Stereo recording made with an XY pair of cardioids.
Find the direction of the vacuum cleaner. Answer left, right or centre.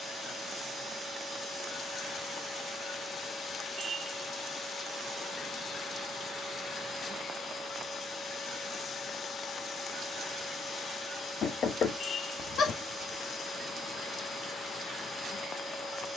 left.